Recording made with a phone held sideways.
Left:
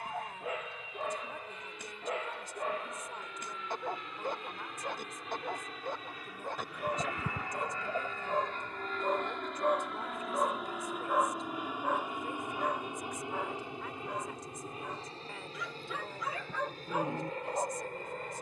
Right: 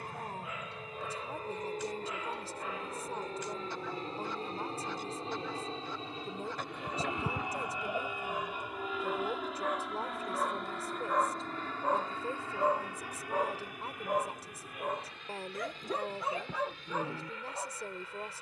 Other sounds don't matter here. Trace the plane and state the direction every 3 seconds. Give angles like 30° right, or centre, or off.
50° right, 40° right, 20° right, centre, 20° left, 40° left.